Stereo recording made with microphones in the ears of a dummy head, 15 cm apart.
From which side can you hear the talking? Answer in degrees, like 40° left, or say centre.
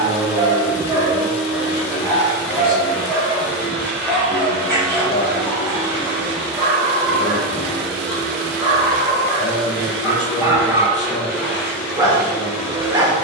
60° left.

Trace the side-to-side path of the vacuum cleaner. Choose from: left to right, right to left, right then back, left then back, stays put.
stays put.